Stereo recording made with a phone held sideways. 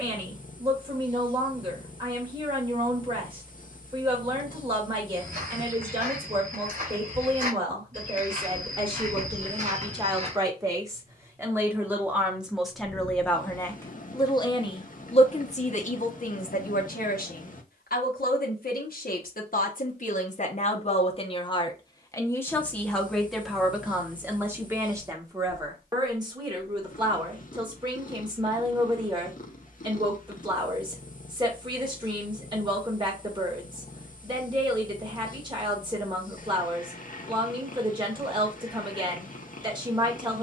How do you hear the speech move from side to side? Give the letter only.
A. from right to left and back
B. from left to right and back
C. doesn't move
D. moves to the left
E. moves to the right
A.